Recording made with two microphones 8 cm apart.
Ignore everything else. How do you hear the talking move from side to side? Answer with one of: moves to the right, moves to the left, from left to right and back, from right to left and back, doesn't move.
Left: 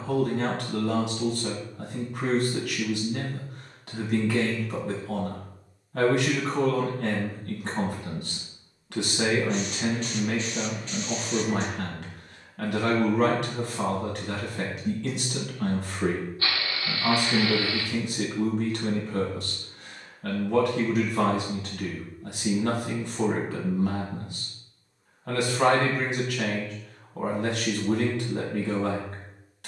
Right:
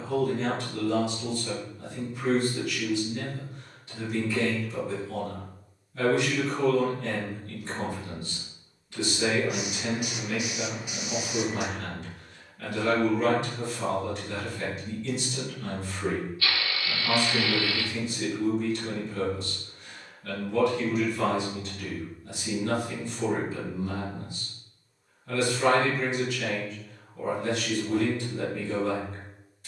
doesn't move.